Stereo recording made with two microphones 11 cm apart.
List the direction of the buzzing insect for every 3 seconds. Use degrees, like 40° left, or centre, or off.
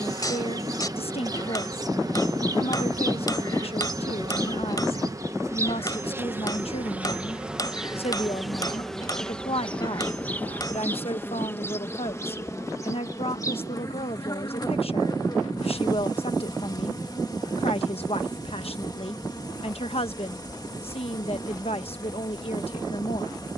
30° right, 30° right, 10° right, 10° left, 30° left, 30° left, 30° left, 30° left.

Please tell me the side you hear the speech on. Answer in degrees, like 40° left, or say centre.
60° left.